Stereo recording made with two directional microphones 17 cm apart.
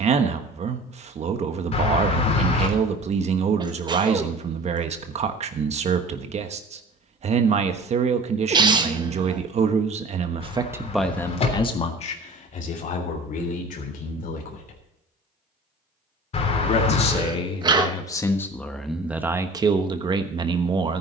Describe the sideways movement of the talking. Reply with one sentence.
In this clip you hear the talking move from right to left and back again.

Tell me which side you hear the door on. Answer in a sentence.
You can hear the door on the left.